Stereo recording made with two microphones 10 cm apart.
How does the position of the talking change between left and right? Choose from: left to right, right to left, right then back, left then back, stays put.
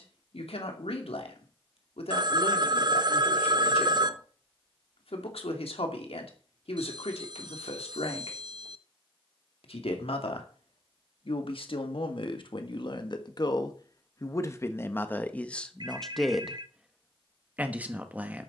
left to right.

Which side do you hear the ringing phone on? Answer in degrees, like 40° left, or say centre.
50° right.